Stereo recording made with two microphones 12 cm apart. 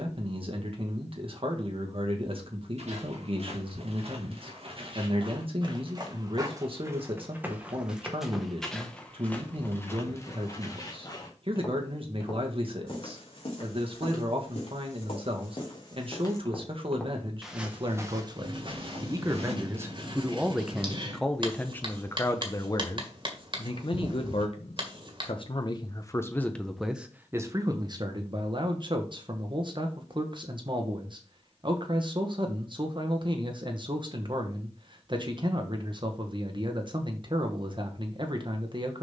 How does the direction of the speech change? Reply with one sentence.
You can hear the speech go left and come back.